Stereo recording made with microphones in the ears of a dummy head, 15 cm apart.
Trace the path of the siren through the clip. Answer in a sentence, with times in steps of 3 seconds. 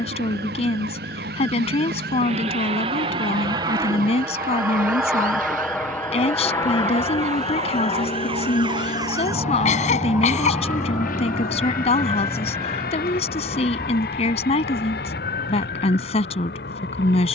In this clip you hear the siren on the right from 0 s, in the centre from 9 s and on the left from 12 s.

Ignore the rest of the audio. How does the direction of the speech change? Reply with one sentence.
You can hear the speech stay put.